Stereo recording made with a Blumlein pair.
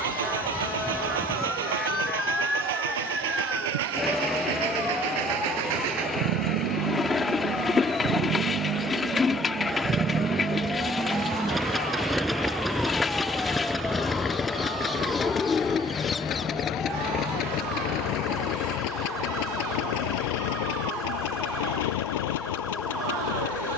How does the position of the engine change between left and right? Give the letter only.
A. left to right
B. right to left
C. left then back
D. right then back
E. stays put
B.